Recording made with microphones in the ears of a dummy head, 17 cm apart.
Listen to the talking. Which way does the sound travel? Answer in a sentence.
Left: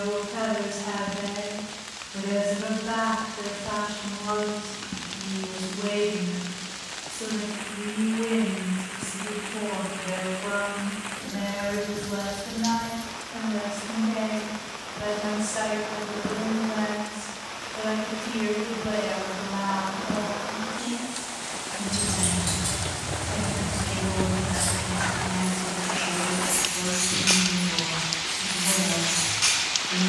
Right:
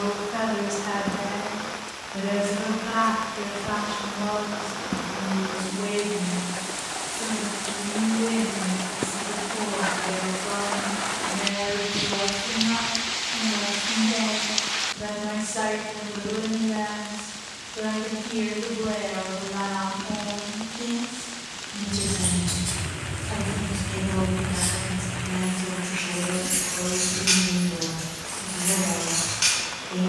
You can hear the talking move to the left.